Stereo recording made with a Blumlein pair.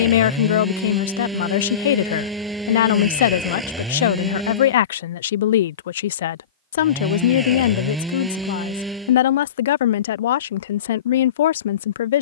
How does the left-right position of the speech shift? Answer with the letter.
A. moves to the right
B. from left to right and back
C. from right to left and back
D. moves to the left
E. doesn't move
E.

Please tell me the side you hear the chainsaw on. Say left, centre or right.
centre.